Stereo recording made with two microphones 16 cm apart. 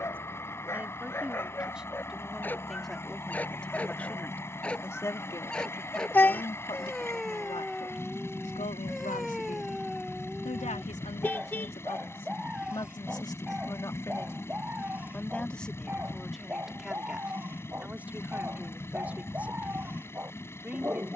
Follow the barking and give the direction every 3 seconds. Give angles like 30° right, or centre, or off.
10° left, 10° left, centre, centre, 10° right, 10° right, 10° right.